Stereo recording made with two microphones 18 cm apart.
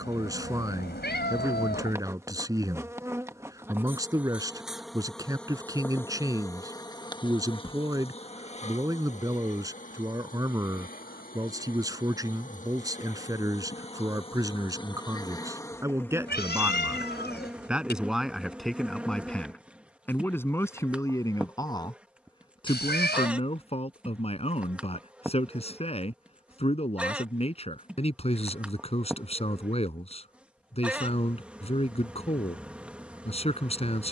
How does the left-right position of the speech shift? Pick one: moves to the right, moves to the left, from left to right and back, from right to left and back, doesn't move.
moves to the left.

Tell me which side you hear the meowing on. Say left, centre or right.
left.